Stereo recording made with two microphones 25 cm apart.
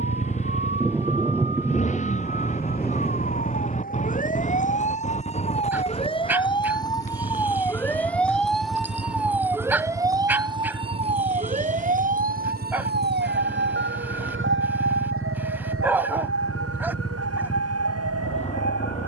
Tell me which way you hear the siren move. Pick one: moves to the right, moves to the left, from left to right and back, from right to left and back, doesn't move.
moves to the right.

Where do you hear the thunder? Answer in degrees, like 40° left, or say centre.
10° right.